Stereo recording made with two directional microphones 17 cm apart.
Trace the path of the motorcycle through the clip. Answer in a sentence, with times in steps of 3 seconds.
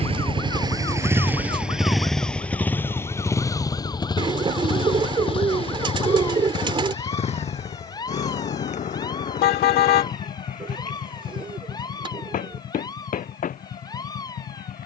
You can hear the motorcycle in the centre from 0 s and on the left from 3 s.